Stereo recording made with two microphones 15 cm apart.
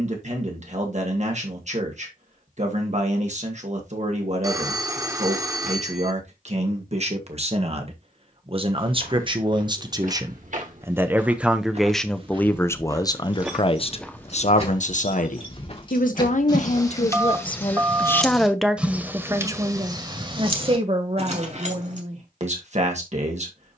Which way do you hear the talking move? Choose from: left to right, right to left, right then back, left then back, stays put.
left then back.